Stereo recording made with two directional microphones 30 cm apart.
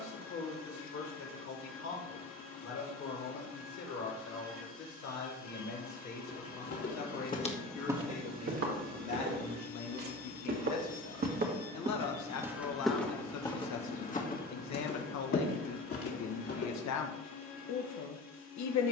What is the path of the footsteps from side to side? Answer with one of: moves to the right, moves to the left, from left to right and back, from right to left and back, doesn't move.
from left to right and back.